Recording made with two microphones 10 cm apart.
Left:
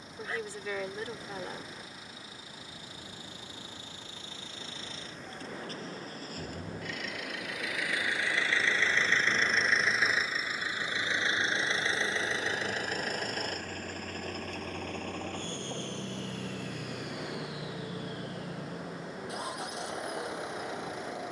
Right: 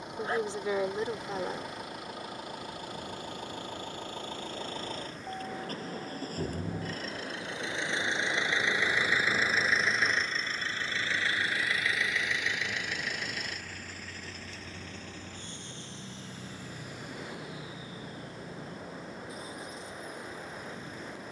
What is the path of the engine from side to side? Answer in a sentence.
You can hear the engine travel towards the left.